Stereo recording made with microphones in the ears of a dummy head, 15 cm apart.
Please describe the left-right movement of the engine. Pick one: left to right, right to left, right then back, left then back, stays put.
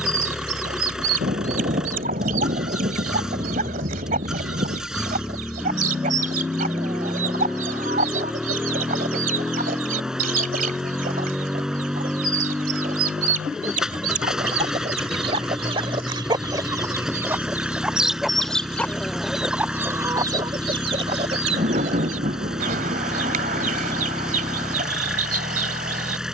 stays put.